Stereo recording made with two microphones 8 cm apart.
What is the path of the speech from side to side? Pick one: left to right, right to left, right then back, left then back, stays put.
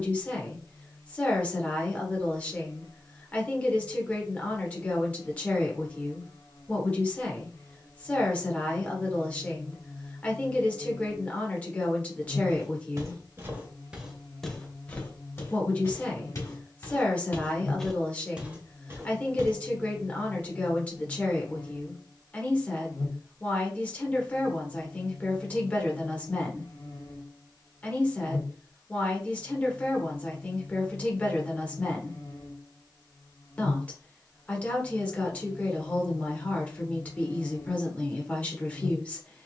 stays put.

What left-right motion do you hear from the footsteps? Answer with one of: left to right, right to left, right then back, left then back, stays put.
left then back.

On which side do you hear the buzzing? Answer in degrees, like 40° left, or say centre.
70° left.